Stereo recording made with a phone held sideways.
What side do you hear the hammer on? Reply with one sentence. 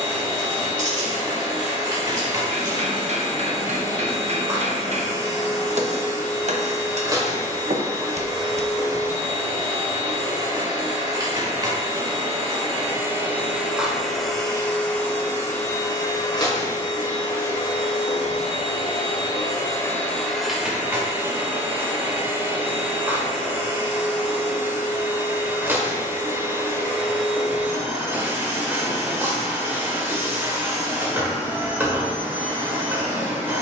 You can hear the hammer on the right.